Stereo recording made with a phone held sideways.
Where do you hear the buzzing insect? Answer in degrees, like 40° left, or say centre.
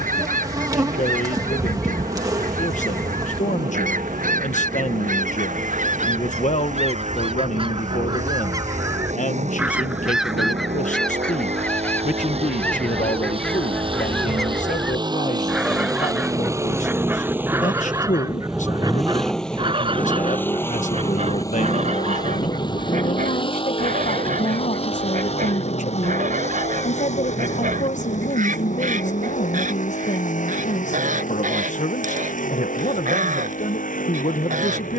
30° right.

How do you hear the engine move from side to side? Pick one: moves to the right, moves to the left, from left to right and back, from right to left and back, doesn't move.
moves to the left.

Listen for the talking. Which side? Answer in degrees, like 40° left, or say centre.
60° left.